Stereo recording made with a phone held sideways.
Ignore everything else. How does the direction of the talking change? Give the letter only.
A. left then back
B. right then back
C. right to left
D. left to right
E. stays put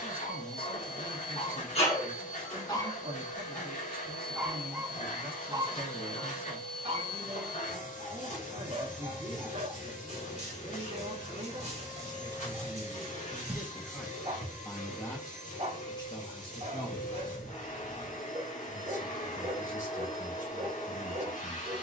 C.